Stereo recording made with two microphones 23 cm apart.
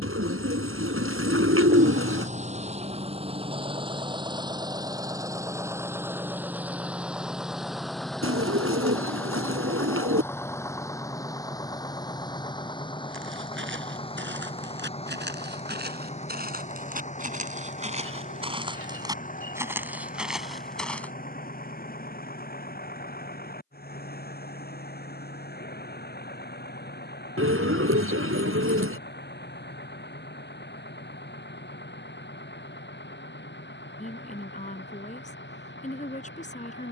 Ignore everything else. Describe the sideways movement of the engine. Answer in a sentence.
You can hear the engine move from right to left.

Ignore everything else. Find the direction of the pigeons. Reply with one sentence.
You can hear the pigeons on the right.